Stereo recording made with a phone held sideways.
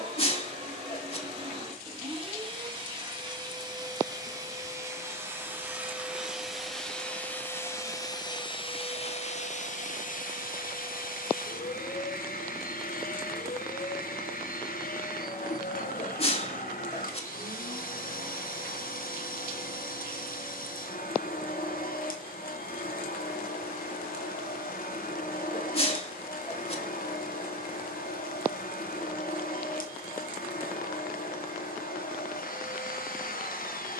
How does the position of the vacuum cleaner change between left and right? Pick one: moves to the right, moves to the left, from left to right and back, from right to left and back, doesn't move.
moves to the left.